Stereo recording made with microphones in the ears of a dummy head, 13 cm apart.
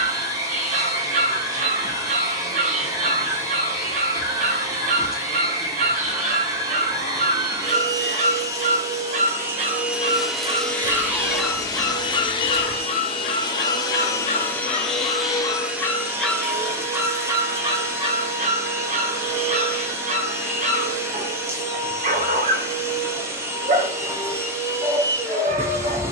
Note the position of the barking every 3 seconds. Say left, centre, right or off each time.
right, right, right, right, left, centre, right, right, right.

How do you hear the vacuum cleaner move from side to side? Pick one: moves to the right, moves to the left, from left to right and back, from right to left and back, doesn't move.
from right to left and back.